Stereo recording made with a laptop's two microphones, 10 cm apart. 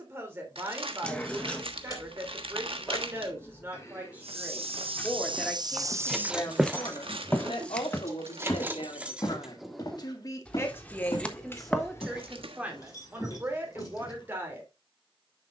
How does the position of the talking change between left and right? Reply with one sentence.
In this clip you hear the talking go left and come back.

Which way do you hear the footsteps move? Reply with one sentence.
You can hear the footsteps move from right to left.